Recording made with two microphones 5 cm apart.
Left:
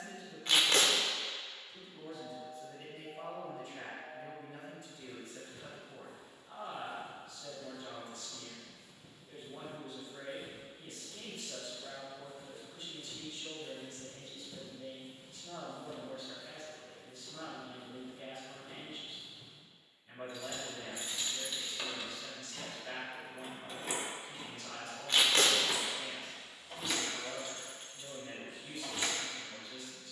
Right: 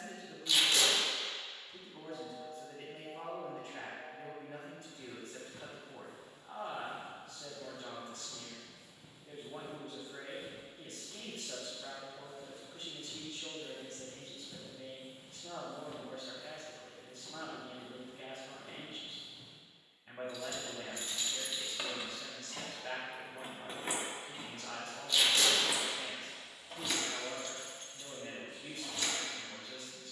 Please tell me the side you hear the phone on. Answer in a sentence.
You can hear the phone on the right.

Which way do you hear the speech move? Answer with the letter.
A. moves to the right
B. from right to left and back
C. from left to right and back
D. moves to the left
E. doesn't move
E.